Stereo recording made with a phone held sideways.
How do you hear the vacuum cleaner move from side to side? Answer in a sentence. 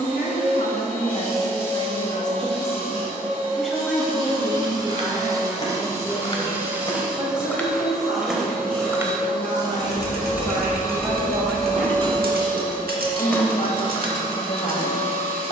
In this clip you hear the vacuum cleaner move from right to left.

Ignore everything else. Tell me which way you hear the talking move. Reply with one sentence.
In this clip you hear the talking go right and come back.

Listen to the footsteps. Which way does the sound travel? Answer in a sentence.
You can hear the footsteps go right and come back.